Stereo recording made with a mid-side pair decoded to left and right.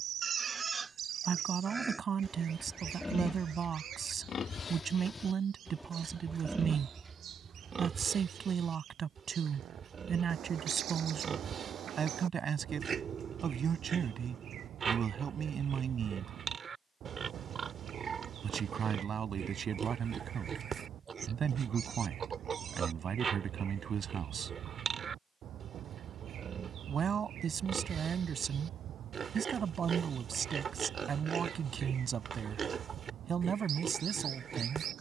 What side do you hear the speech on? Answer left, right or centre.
right.